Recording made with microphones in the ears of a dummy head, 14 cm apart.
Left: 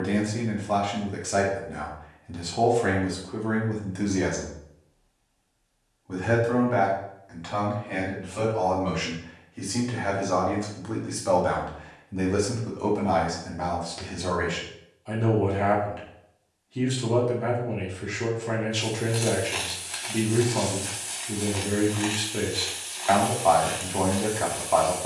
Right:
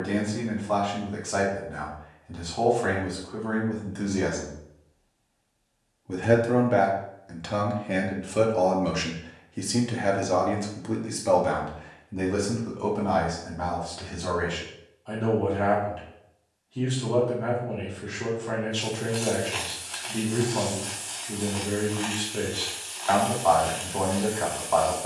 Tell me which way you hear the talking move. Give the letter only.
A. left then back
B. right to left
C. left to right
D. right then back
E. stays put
D.